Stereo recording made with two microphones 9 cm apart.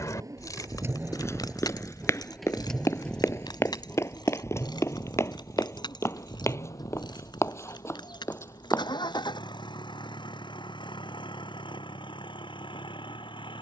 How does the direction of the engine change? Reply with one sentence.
You can hear the engine travel towards the left.